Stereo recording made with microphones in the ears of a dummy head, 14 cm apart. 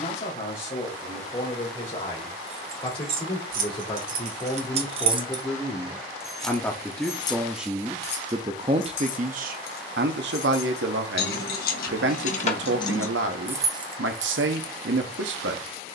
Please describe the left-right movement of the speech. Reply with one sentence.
You can hear the speech move from left to right.